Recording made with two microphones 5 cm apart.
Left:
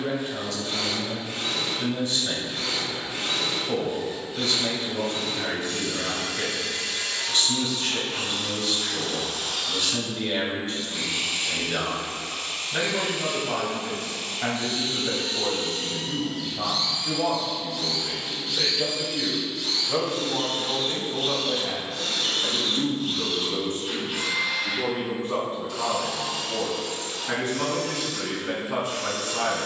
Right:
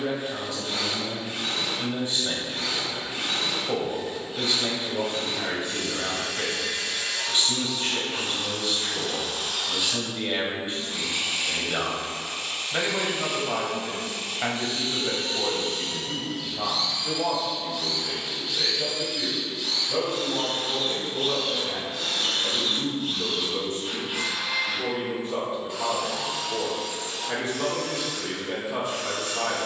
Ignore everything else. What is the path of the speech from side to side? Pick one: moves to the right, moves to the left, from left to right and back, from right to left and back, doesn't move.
moves to the left.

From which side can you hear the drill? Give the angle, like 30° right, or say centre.
20° right.